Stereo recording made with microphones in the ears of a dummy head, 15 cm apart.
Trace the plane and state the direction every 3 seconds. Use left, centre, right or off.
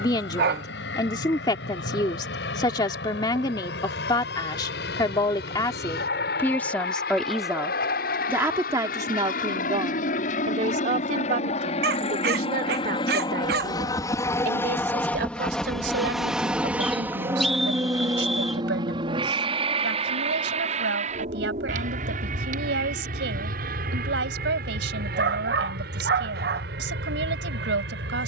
left, left, left, left, left, centre, right, right, right, right.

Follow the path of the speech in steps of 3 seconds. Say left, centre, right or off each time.
left, left, centre, right, right, right, right, right, right, right.